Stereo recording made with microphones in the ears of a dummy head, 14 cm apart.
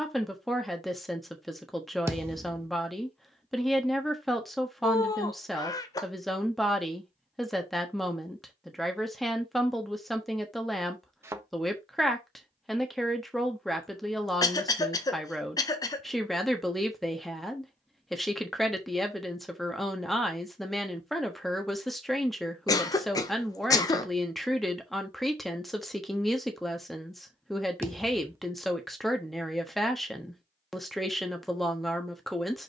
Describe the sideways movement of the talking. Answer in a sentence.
You can hear the talking stay put.